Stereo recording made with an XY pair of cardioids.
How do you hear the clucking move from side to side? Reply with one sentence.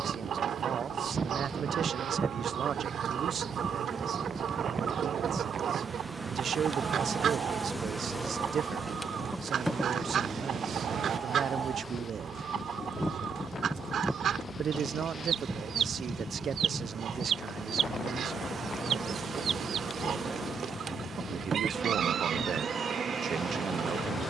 You can hear the clucking stay in one place.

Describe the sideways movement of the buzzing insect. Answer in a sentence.
In this clip you hear the buzzing insect go left and come back.